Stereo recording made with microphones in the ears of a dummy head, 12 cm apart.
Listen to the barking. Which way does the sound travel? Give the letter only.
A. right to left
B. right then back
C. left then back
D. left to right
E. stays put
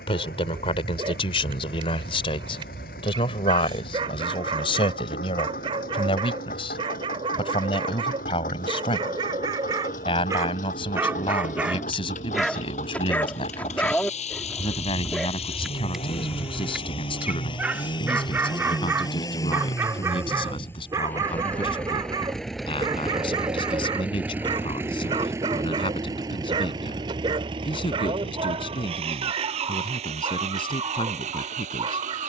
C.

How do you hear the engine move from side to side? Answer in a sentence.
You can hear the engine go from the left side to the right.